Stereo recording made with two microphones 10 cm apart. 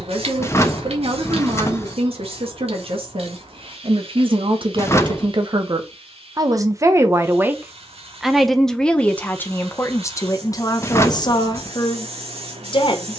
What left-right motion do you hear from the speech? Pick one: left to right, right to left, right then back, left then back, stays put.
right to left.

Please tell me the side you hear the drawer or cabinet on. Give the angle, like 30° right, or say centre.
30° left.